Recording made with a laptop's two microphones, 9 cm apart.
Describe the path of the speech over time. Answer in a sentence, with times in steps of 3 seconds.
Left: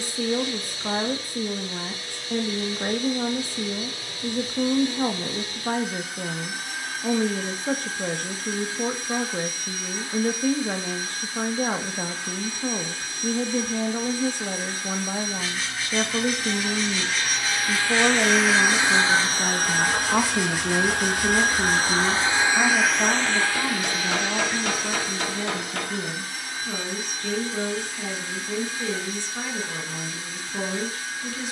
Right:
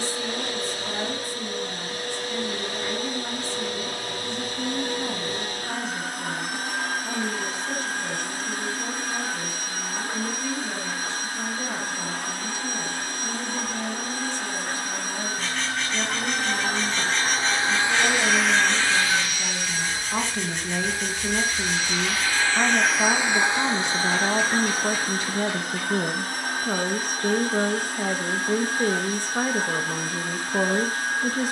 In this clip you hear the speech on the left from 0 s, in the centre from 21 s and on the right from 24 s.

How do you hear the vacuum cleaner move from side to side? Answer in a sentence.
In this clip you hear the vacuum cleaner move from right to left and back again.